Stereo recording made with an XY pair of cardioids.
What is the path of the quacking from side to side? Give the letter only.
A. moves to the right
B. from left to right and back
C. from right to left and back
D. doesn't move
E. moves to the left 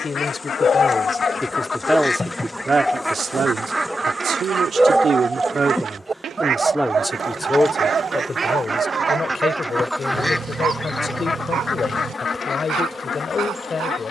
B.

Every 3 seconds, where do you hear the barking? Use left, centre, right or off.
left, centre, right, right, right.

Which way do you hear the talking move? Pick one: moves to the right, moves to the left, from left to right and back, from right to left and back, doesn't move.
from left to right and back.